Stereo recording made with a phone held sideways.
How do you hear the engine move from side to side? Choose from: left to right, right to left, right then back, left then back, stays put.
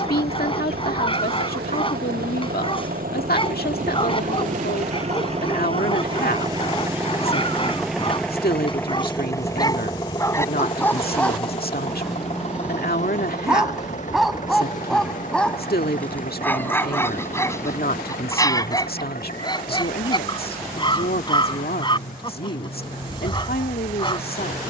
right to left.